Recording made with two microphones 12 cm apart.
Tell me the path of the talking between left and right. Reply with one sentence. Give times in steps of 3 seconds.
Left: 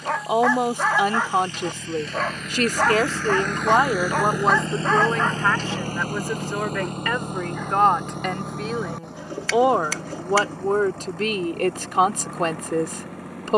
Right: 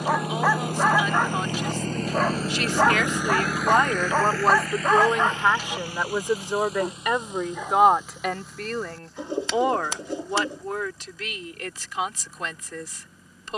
In this clip you hear the talking on the left from 0 s, in the centre from 3 s and on the left from 9 s.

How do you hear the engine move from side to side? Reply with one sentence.
In this clip you hear the engine move to the left.